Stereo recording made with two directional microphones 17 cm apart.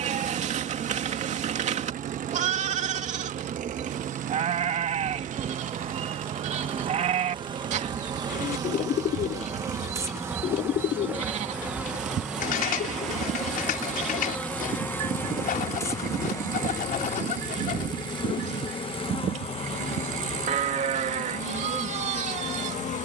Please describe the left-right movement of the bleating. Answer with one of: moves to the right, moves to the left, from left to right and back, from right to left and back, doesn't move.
doesn't move.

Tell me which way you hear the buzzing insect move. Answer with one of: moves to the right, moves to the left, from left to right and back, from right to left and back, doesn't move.
moves to the left.